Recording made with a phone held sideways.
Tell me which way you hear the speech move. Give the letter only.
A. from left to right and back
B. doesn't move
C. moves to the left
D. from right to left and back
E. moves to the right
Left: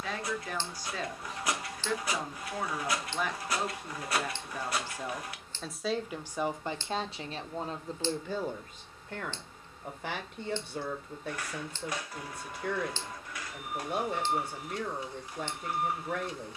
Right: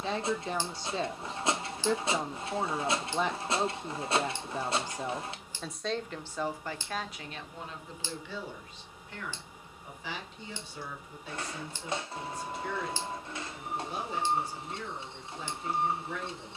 C.